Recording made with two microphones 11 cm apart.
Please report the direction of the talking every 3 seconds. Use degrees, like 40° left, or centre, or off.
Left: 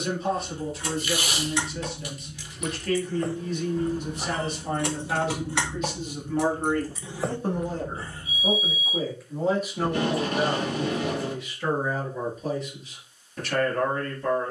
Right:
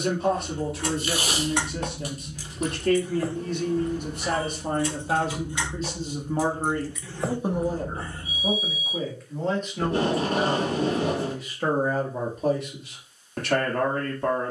70° right, 50° right, 20° right, 10° right, 60° right.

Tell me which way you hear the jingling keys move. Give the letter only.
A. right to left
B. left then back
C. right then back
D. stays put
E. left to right
B.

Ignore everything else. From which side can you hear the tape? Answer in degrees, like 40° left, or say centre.
40° right.